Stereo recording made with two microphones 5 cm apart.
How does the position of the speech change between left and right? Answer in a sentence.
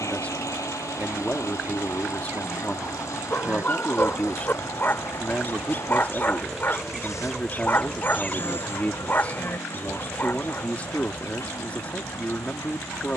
You can hear the speech stay in one place.